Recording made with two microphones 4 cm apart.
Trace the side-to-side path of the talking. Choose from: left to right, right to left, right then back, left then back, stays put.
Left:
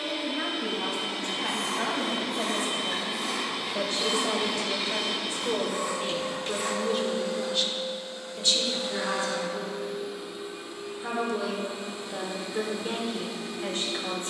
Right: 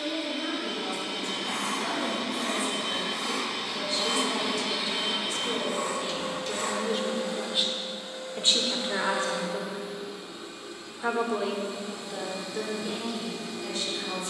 right then back.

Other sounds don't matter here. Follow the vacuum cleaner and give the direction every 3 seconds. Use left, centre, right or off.
left, centre, right, centre, left.